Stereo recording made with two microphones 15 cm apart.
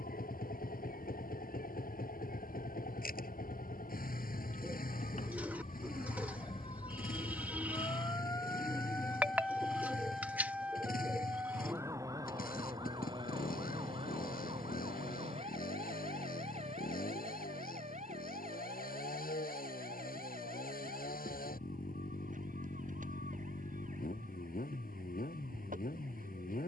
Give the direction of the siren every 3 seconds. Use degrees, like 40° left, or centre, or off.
70° left, 60° left, 30° left, 10° right, 30° right, 50° right, 50° right, 60° right, 60° right.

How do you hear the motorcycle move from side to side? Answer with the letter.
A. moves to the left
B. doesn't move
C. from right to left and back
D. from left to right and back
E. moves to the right
B.